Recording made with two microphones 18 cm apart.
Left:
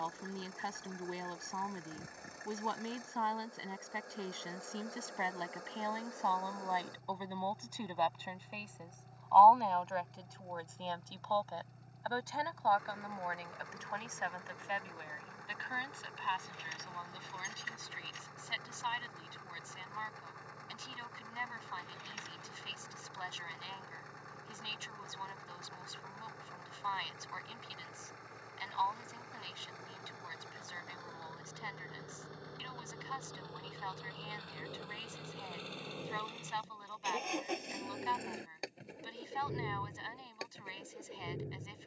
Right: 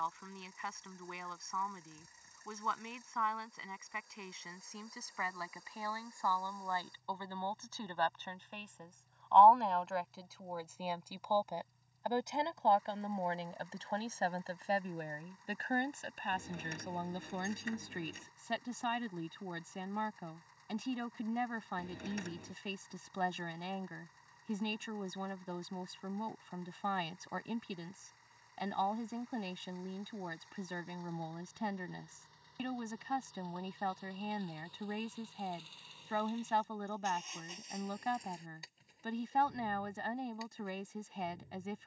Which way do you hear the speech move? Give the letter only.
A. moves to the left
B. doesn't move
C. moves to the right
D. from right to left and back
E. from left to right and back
C.